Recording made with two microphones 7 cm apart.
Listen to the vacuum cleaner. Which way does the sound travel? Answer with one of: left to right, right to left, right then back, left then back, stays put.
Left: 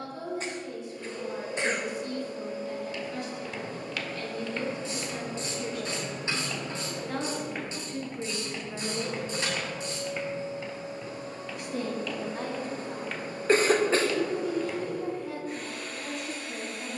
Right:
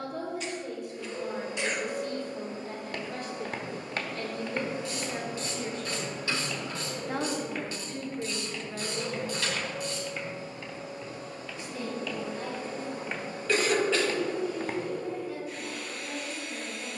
right to left.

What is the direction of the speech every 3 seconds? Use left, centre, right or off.
right, right, centre, left, left, left.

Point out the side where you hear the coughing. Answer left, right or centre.
left.